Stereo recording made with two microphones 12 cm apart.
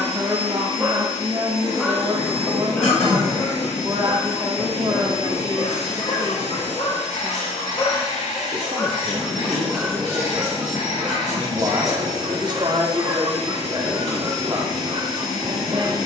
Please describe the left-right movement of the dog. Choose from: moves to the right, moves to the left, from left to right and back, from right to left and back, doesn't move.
from right to left and back.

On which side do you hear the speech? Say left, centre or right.
right.